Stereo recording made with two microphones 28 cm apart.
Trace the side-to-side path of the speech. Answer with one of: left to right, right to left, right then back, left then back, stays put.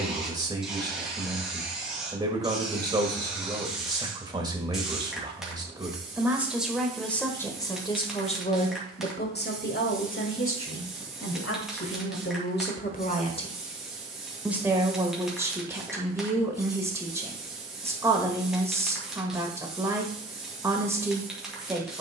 left then back.